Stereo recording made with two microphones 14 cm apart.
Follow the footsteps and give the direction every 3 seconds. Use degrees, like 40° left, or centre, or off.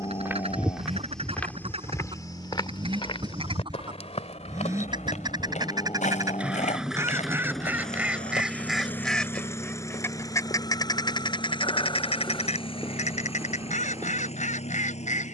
10° left, 50° left, 60° left, 40° left, 20° right.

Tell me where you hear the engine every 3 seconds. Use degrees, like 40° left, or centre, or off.
40° right, 20° right, centre, 20° left, 40° left.